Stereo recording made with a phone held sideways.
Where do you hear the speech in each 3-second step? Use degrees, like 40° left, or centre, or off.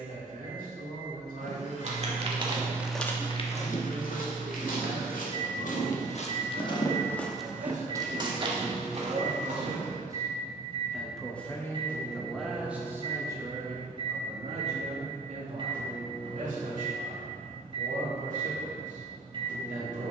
70° right, 70° right, 60° right, 10° right, 20° right, 60° right, 70° right.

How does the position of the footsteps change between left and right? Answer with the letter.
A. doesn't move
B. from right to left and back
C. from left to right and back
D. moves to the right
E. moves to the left
B.